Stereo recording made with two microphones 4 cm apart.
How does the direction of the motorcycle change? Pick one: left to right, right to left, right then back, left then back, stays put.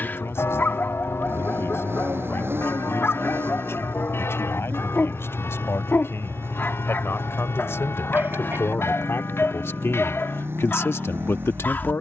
stays put.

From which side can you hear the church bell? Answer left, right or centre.
left.